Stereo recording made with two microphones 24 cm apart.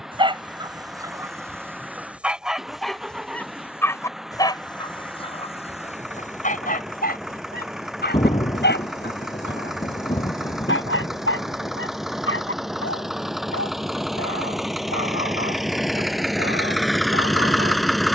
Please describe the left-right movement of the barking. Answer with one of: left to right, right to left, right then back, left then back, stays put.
right to left.